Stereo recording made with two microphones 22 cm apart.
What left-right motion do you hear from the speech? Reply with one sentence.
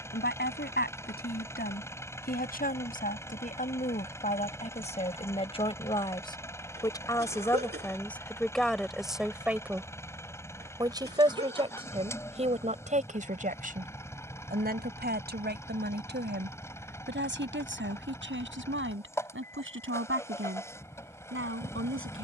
In this clip you hear the speech go from the left side to the right.